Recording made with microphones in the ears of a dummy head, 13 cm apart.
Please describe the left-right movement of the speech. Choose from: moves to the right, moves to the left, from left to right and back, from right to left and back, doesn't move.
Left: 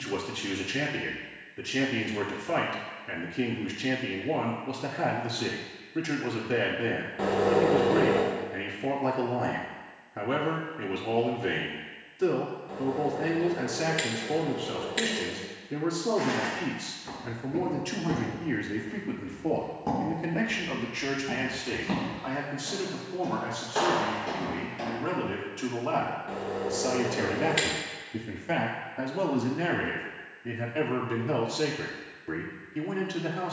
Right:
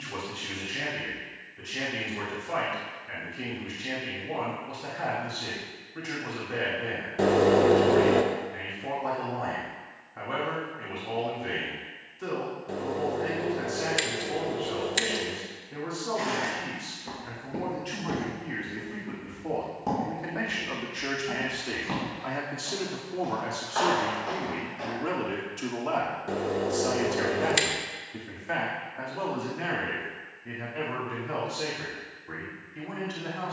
from left to right and back.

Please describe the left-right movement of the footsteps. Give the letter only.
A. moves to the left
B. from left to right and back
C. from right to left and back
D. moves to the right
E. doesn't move
A.